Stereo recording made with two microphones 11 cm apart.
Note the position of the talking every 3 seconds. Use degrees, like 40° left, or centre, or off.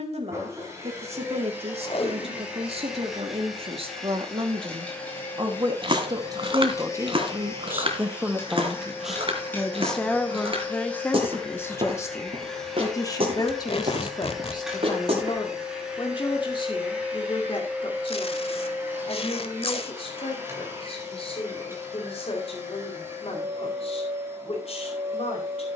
70° right, 50° right, 20° right, 10° left, 30° left, 50° left, 50° left, 60° left, 60° left.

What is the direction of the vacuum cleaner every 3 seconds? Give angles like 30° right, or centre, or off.
20° right, 10° left, 20° left, 10° left, centre, 10° right, 20° right, 20° right, 20° right.